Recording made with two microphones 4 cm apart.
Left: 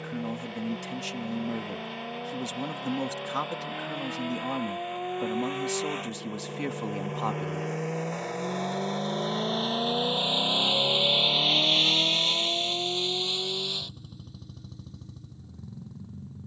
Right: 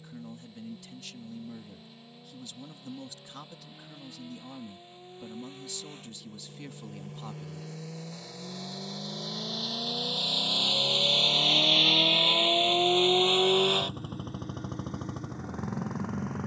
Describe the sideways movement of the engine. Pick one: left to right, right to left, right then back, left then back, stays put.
left to right.